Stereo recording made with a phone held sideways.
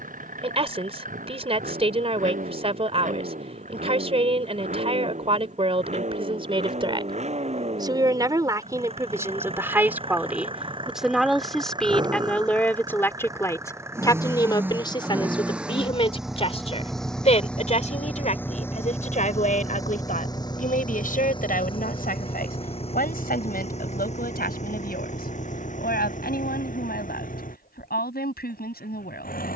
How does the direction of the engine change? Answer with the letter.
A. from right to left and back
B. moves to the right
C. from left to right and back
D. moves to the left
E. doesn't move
D.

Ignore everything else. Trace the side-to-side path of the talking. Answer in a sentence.
In this clip you hear the talking move from right to left.